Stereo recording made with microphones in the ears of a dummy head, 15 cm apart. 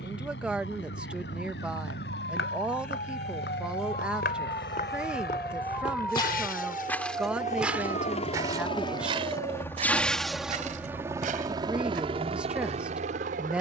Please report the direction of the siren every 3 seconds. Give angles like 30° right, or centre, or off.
60° left, 30° left, 30° right, 50° right, 60° right.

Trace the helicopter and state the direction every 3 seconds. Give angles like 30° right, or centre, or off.
80° left, 70° left, 50° left, centre, 40° right.